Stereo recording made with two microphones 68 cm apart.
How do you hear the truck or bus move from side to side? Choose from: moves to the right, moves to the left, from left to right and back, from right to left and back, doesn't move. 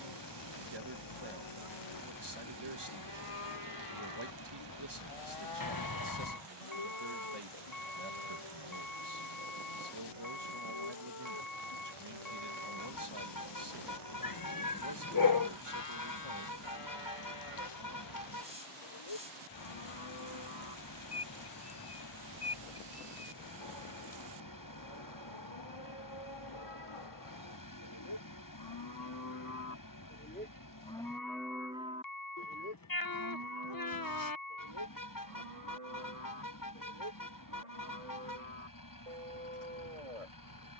doesn't move.